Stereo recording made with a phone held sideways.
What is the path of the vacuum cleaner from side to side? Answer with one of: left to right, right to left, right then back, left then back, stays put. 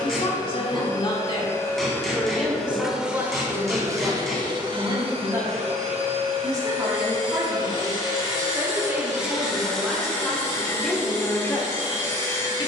right then back.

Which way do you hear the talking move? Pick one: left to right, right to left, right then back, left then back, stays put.
right then back.